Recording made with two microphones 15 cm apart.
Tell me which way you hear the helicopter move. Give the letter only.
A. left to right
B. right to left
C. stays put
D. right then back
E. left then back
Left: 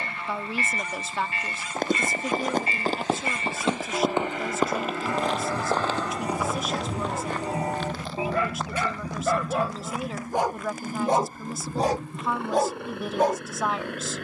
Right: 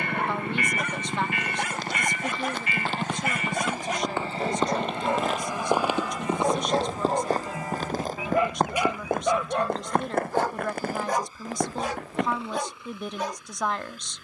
B.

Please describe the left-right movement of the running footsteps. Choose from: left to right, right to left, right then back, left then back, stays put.
left to right.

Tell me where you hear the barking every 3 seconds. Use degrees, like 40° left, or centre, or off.
70° right, 60° right, 30° right, 10° left, 50° left.